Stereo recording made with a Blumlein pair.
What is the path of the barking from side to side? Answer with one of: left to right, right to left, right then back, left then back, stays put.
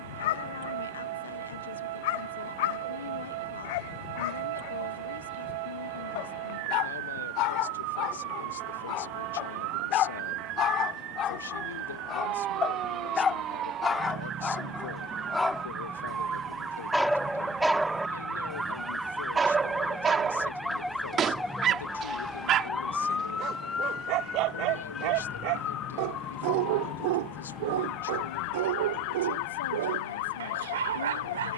left to right.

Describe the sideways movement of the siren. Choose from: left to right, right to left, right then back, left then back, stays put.
right to left.